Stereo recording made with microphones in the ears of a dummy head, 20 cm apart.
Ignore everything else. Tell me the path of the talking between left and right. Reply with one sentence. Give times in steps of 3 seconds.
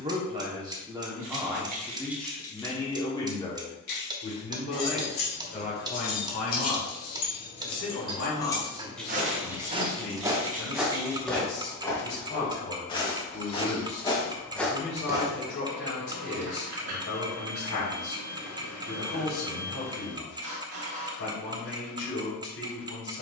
You can hear the talking in the centre from 0 s and on the left from 3 s.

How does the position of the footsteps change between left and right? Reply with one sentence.
In this clip you hear the footsteps move from right to left and back again.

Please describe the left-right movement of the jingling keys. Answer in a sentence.
You can hear the jingling keys move from right to left and back again.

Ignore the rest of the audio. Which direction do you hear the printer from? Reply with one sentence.
In this clip you hear the printer on the right.